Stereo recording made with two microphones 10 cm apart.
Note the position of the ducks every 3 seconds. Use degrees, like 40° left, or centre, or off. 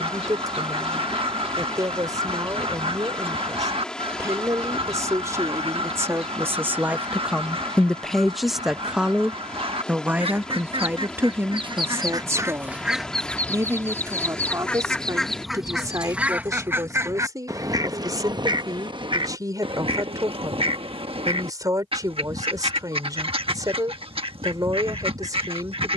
60° right, 60° right, 60° right, 60° right, centre, 20° right, 50° right, 60° right, 60° right.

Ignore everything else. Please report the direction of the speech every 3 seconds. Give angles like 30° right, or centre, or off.
40° right, 30° right, 10° right, 20° right, 30° right, 30° right, 40° right, 40° right, 40° right.